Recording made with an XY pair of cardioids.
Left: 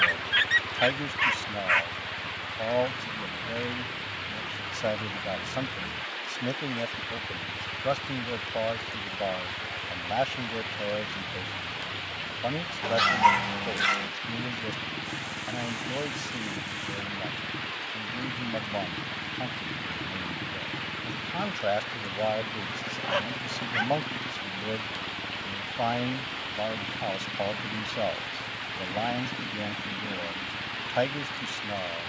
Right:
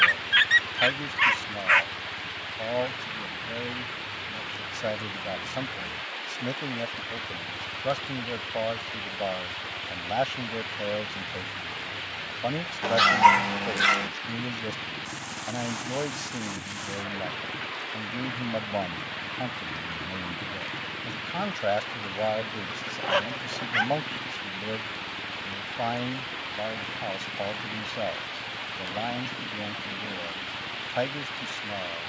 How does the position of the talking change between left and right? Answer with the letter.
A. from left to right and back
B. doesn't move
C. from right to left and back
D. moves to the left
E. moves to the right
A.